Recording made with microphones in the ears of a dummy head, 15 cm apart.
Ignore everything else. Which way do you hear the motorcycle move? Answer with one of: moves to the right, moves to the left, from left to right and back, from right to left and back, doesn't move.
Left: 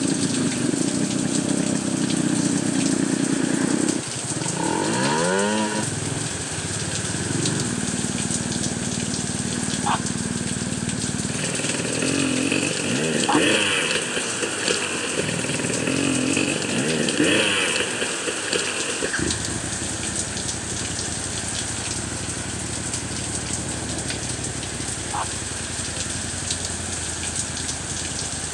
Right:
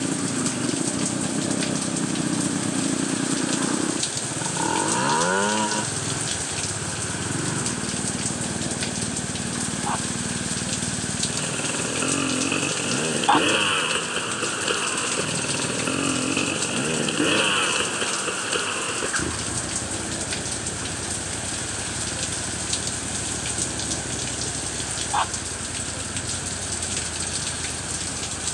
doesn't move.